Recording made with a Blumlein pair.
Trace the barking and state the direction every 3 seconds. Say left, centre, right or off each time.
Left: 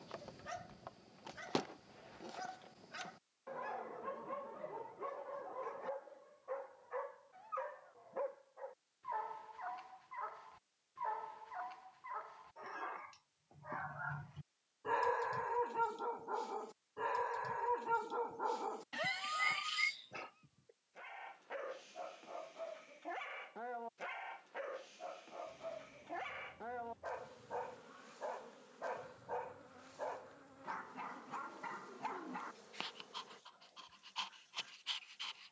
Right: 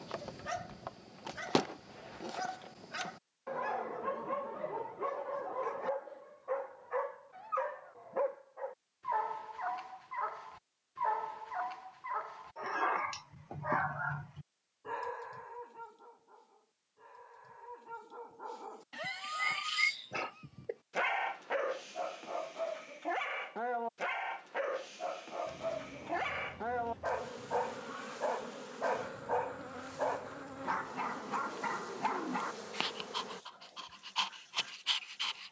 right, right, right, right, right, left, centre, right, right, right, right, right.